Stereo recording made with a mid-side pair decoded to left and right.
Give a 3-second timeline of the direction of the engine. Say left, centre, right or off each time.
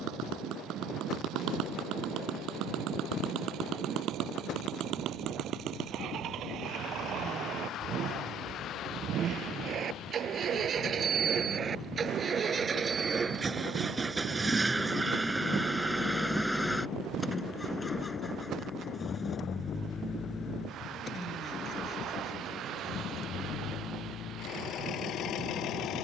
right, right, right, right, right, centre, left, left, left.